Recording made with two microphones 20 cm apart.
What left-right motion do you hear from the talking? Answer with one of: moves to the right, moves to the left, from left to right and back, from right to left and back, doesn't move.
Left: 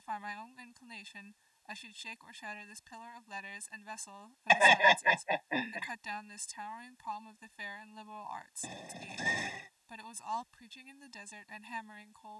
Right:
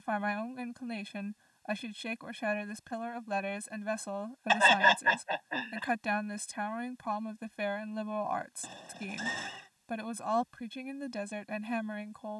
doesn't move.